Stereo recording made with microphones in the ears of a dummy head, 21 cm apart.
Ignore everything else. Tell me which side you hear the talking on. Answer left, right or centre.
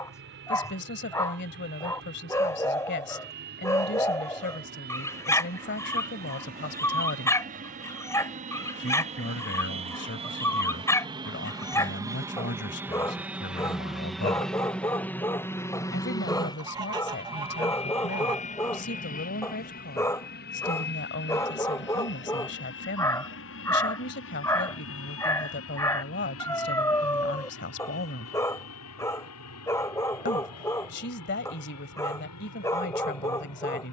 left.